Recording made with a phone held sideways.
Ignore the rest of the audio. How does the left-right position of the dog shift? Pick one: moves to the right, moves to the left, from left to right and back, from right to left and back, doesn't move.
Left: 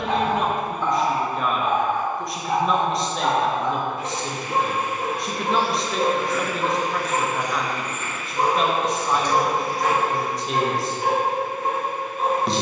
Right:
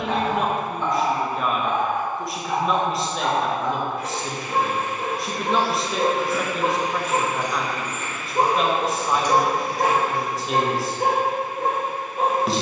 moves to the right.